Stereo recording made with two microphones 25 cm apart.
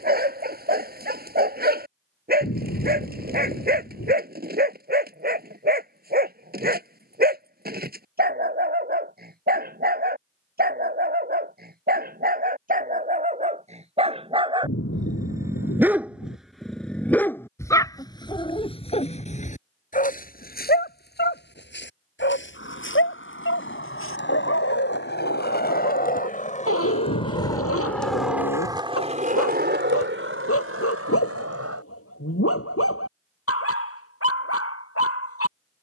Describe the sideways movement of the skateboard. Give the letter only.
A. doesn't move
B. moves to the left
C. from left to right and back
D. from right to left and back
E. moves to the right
E.